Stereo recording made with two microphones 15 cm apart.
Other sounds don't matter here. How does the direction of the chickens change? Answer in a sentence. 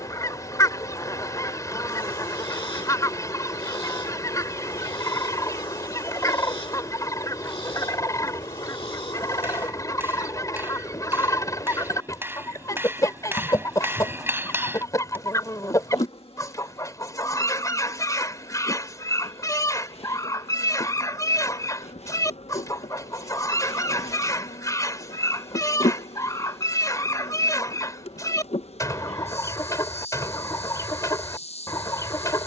You can hear the chickens stay in one place.